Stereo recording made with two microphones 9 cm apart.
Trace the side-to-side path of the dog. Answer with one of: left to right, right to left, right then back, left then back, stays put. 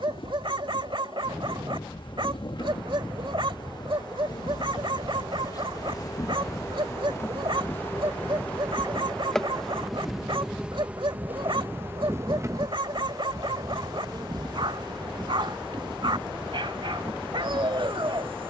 stays put.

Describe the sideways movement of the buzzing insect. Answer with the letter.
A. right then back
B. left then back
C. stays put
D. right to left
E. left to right
E.